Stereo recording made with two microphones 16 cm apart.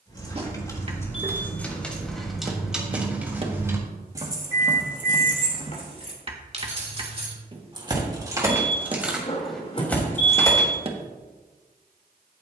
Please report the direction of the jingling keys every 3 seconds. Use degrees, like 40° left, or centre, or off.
10° left, 30° right, 30° right, 10° left.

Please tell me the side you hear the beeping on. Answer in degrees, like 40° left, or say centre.
40° left.